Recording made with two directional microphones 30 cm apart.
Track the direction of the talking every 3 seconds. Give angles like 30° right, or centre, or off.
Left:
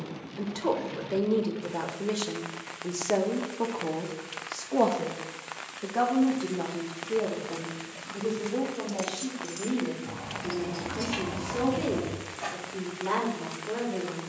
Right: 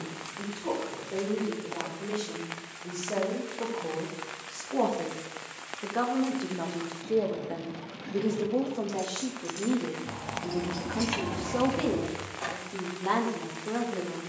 40° left, 20° left, 20° right, 40° right, 40° right.